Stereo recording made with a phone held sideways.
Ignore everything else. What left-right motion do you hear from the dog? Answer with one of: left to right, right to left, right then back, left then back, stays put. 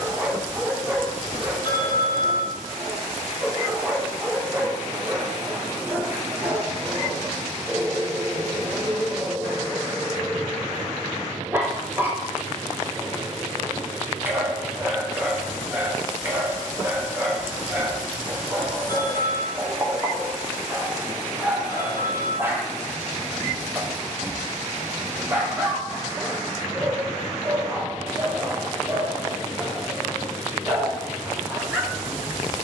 stays put.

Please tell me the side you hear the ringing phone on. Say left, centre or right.
left.